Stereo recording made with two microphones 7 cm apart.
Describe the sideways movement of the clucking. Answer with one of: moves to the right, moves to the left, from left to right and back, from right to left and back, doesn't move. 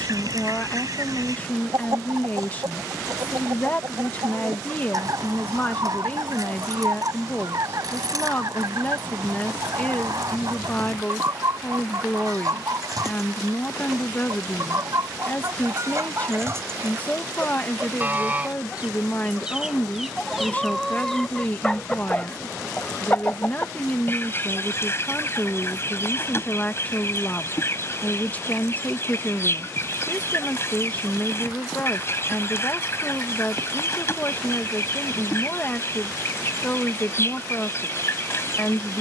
moves to the left.